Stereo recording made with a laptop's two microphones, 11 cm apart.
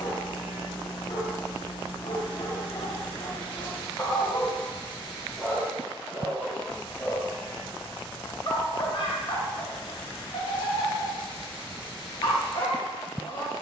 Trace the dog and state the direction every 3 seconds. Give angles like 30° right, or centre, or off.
50° left, 10° left, 20° left, 50° left, 50° left.